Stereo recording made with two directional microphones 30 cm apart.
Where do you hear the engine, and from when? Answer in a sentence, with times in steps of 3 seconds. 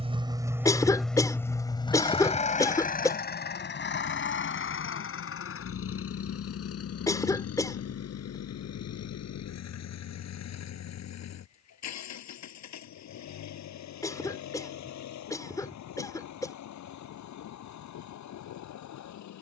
In this clip you hear the engine in the centre from 0 s and on the left from 3 s.